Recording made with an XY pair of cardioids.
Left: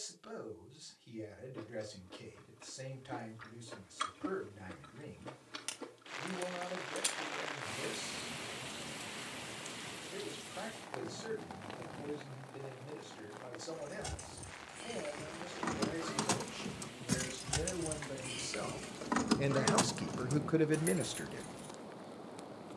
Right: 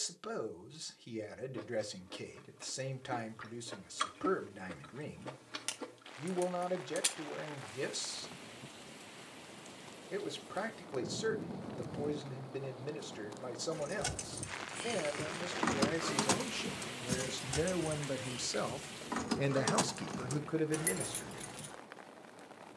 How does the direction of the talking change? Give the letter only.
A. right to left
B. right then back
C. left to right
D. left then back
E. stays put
A.